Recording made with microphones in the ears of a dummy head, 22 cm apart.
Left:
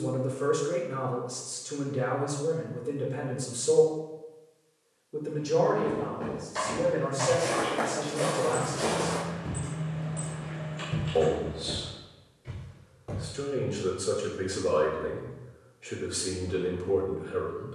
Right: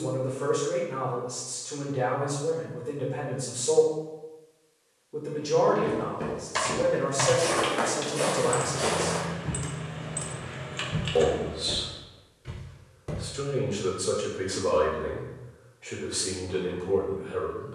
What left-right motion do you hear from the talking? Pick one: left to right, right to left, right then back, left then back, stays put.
right then back.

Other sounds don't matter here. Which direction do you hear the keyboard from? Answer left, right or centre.
right.